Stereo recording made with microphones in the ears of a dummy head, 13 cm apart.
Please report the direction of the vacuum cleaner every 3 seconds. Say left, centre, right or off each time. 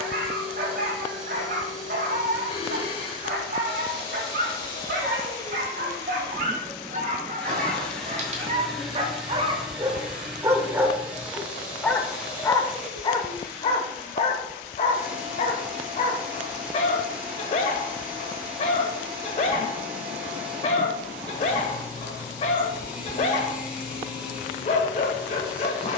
left, left, centre, centre, centre, centre, centre, centre, centre.